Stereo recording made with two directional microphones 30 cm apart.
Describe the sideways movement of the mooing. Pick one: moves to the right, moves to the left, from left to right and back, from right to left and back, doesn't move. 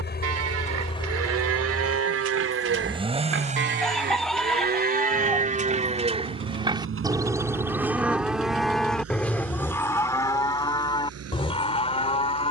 moves to the left.